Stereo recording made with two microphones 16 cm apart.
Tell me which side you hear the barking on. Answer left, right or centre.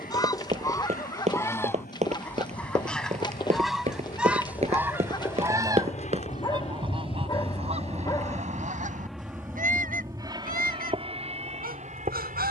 left.